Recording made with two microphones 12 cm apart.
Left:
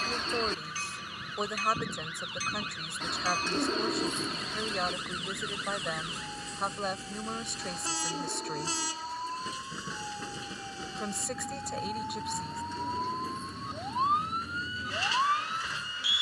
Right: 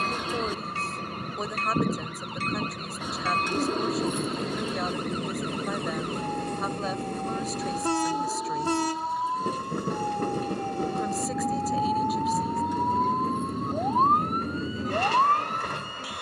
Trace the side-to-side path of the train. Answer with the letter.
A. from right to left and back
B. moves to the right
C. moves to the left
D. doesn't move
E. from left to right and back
D.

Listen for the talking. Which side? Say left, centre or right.
centre.